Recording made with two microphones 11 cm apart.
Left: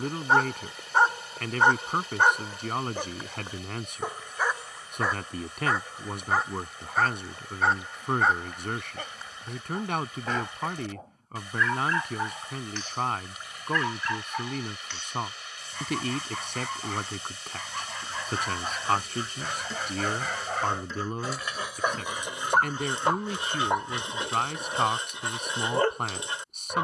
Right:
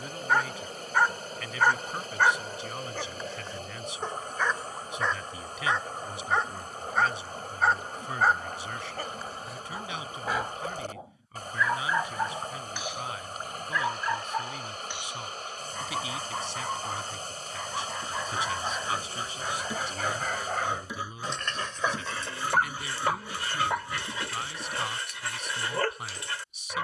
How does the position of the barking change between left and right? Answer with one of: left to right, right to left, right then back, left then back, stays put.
right then back.